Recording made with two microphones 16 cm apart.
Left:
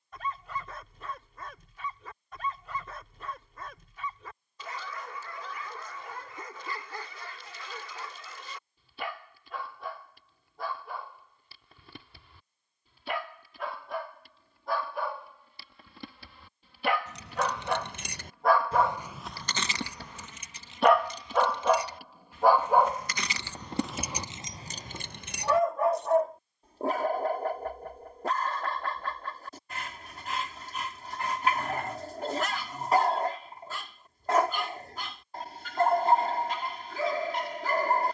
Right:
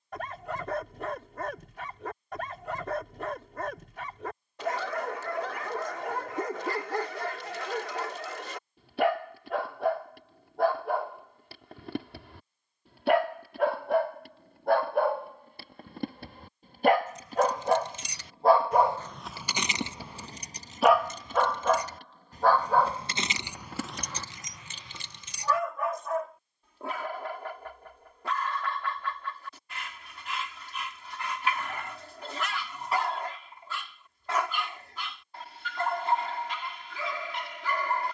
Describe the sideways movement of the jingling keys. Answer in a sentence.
In this clip you hear the jingling keys go right and come back.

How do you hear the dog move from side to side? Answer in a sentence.
In this clip you hear the dog travel towards the left.